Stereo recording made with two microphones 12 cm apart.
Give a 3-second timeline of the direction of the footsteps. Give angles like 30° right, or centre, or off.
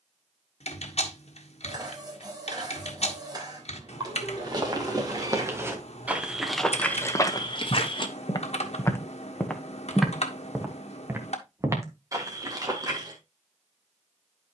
off, 30° right, 20° left, 10° right, 30° right.